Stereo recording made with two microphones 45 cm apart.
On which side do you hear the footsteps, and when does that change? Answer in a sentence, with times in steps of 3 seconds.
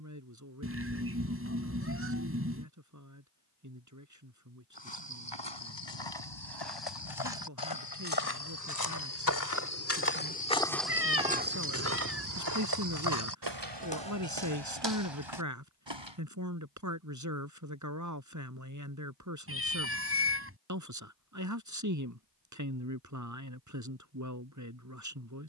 In this clip you hear the footsteps not at all from 0 s, on the left from 3 s, in the centre from 9 s, on the right from 12 s and not at all from 18 s.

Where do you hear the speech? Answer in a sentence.
In this clip you hear the speech on the right.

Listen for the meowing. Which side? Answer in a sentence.
In this clip you hear the meowing on the right.